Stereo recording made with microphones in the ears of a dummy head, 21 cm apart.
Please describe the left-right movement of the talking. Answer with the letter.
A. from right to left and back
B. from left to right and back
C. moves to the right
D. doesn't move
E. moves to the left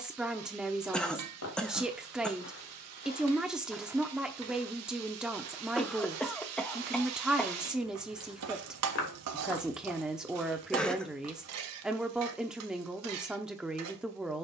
D.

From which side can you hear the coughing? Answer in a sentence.
You can hear the coughing in the centre.